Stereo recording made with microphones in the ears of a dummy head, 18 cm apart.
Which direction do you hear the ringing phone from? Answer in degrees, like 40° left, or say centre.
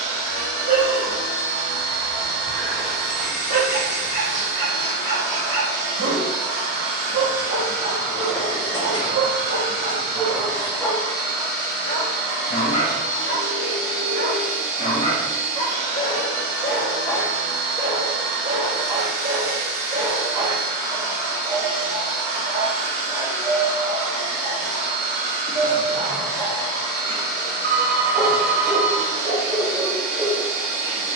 60° right.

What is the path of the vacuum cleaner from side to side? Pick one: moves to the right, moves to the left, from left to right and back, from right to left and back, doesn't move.
doesn't move.